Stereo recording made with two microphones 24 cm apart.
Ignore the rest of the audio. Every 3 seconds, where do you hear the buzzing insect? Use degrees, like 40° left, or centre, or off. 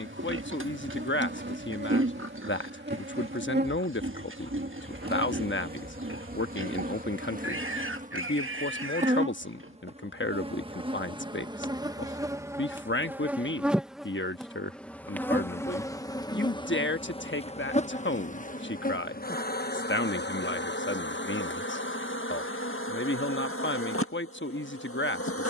50° right, 40° right, 40° right, 20° right, 10° right, 20° left, 40° left, 60° left, 70° left.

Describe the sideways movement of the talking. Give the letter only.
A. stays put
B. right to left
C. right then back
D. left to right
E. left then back
A.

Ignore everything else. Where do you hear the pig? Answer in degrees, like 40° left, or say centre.
60° right.